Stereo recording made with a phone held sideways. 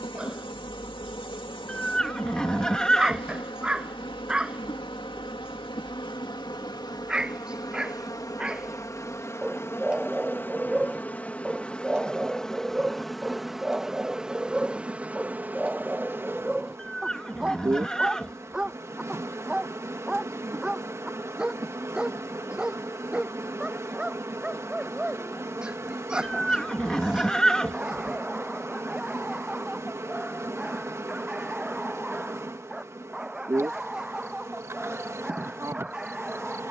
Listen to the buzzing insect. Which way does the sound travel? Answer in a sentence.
You can hear the buzzing insect go from the left side to the right.